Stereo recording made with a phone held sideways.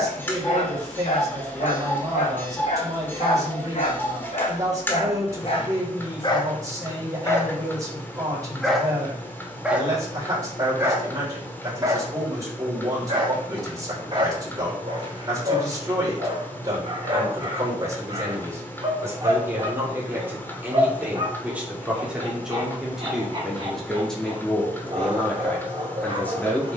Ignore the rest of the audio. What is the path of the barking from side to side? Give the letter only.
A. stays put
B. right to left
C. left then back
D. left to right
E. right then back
D.